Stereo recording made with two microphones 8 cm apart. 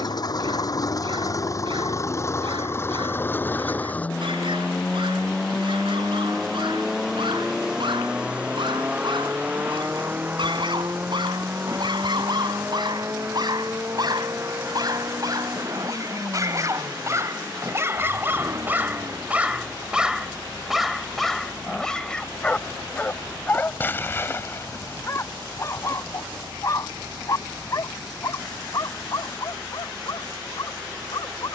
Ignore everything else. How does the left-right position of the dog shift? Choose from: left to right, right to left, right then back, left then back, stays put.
right to left.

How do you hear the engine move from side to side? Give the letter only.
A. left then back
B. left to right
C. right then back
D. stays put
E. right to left
B.